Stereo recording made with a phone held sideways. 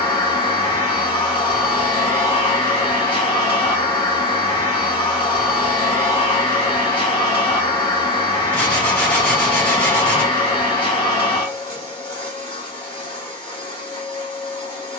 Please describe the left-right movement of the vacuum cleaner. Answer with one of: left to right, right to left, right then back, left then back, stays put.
stays put.